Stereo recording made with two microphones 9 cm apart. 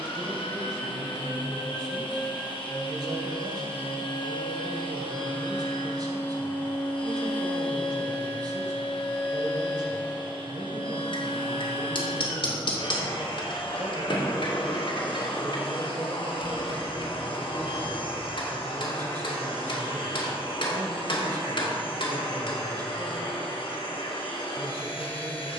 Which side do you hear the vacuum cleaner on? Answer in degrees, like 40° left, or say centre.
80° left.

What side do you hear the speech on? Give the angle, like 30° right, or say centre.
50° right.